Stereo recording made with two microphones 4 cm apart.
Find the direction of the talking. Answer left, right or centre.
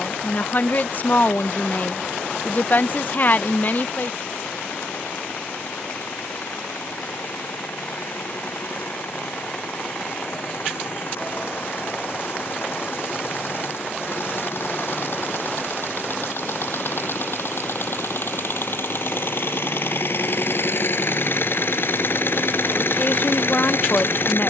left.